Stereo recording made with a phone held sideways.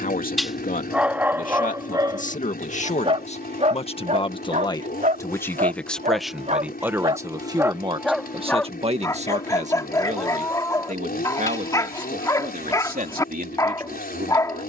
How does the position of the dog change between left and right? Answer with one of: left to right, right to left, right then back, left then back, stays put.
right then back.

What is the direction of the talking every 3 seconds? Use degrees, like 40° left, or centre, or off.
60° left, 30° left, 20° right, 50° right, 70° right.